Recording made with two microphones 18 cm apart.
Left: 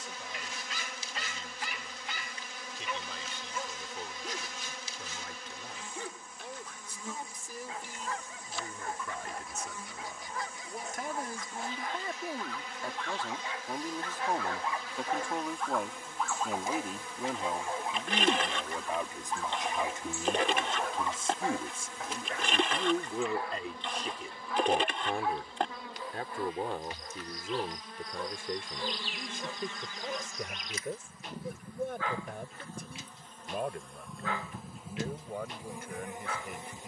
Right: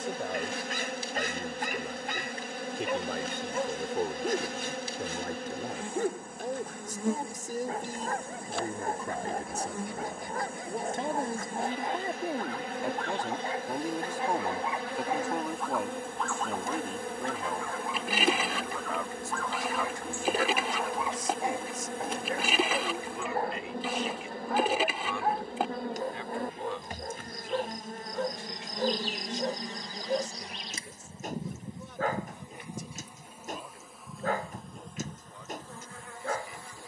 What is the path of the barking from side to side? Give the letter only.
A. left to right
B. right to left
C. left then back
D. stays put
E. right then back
C.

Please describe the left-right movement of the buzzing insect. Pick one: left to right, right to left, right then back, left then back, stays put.
right to left.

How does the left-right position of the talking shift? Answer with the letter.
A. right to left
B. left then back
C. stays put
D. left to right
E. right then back
A.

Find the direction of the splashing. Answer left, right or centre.
centre.